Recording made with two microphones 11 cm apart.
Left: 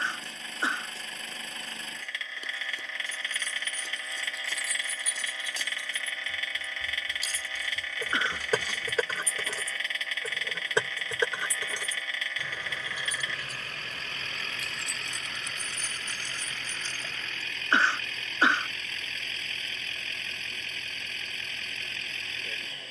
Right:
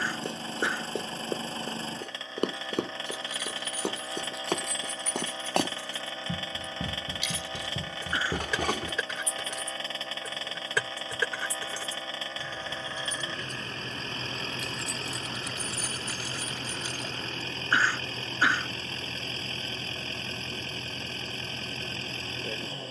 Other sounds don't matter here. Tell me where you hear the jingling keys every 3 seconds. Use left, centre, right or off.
off, centre, left, left, centre, centre, off, off.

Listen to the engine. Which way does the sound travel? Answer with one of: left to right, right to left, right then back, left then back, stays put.
stays put.